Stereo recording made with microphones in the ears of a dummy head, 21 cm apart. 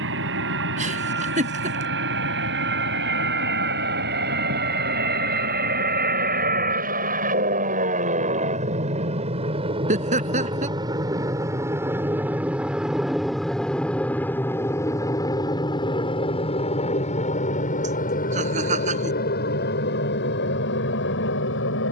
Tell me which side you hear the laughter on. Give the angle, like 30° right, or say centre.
30° right.